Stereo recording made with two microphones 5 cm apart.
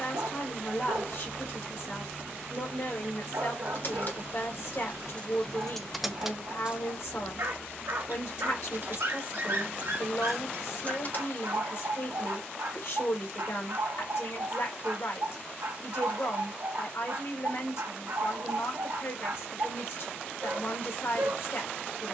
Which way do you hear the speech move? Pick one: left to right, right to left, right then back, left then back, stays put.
stays put.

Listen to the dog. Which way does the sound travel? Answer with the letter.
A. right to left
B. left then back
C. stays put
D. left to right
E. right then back
C.